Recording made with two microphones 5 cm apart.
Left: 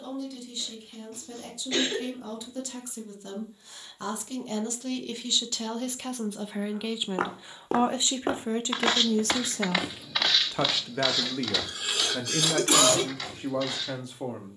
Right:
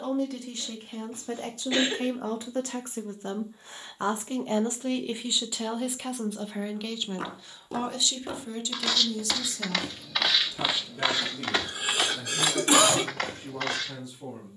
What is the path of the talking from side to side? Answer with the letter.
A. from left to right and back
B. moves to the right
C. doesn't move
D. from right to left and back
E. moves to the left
E.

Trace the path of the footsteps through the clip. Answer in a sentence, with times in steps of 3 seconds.
You can hear the footsteps not at all from 0 s, on the left from 6 s, in the centre from 9 s and on the right from 12 s.